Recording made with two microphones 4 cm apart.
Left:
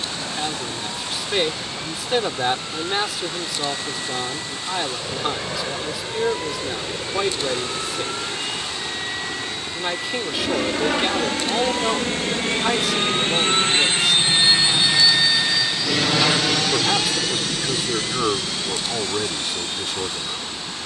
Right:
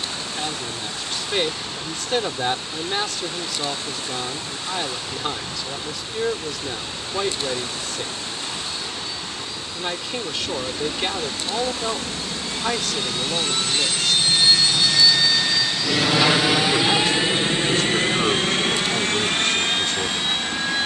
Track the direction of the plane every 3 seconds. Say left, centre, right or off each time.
left, left, left, left, left, centre, right.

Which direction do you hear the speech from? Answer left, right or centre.
centre.